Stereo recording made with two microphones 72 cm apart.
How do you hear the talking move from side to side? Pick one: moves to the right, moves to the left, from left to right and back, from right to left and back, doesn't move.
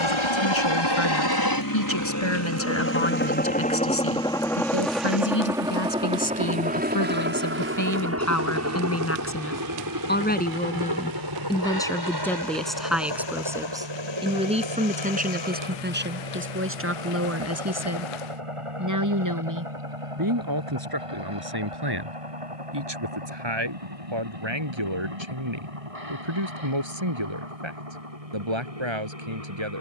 moves to the right.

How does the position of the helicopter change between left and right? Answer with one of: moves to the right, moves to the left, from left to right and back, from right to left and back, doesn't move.
moves to the right.